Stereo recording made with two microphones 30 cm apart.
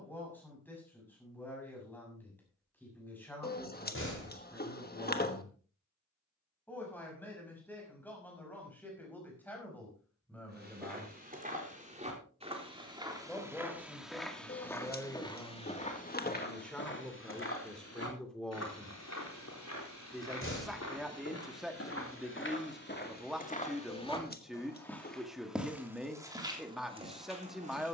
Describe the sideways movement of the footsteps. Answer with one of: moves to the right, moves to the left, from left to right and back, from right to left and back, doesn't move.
from right to left and back.